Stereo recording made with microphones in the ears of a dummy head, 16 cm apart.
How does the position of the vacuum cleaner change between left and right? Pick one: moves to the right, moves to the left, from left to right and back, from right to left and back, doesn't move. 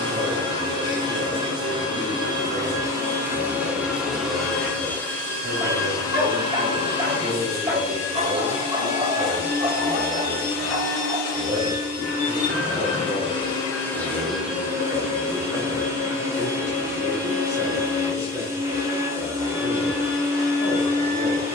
from right to left and back.